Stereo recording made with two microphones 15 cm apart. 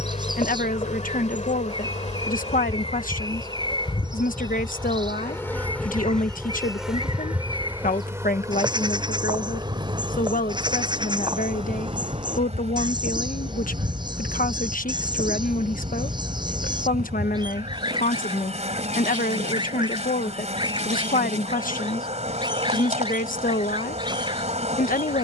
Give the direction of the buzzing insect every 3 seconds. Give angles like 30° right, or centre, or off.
50° left, 30° left, 10° right, 40° right, 50° right, 50° right, 50° right, 50° right, 50° right.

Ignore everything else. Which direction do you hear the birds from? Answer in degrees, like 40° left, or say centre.
30° right.